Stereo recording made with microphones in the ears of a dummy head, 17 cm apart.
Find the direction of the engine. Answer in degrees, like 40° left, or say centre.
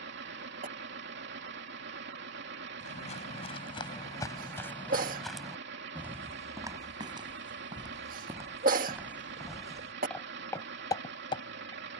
70° right.